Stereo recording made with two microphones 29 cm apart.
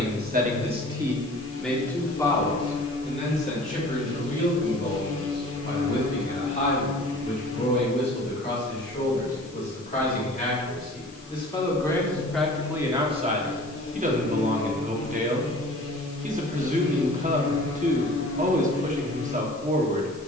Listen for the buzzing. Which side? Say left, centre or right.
left.